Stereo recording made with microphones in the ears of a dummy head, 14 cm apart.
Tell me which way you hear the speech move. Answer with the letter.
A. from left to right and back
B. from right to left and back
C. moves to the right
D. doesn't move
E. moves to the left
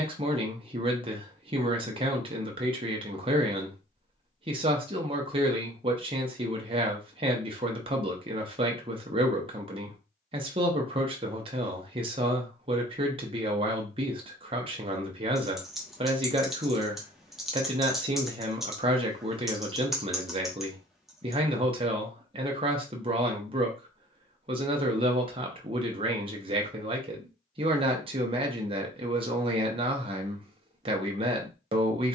D.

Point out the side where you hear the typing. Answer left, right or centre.
centre.